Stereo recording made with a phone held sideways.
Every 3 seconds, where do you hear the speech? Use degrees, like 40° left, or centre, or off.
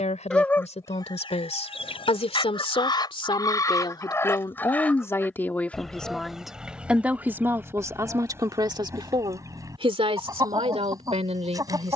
50° left, 30° left, 20° right, 50° right.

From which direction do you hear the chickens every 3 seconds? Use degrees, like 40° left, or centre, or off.
40° left, 20° left, 10° right, 30° right.